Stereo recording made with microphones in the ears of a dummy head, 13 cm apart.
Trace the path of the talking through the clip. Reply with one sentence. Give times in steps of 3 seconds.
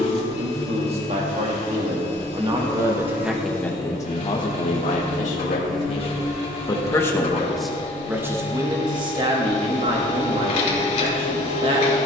You can hear the talking on the right from 0 s, on the left from 3 s, in the centre from 6 s and on the right from 9 s.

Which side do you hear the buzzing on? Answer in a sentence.
You can hear the buzzing in the centre.